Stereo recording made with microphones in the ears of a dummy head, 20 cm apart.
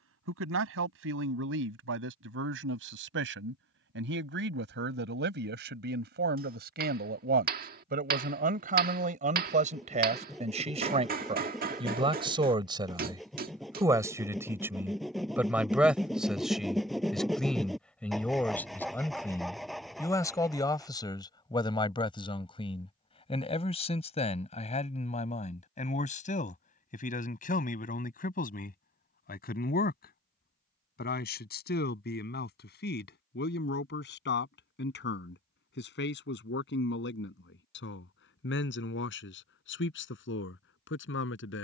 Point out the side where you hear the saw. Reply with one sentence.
In this clip you hear the saw in the centre.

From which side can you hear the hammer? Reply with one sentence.
In this clip you hear the hammer on the right.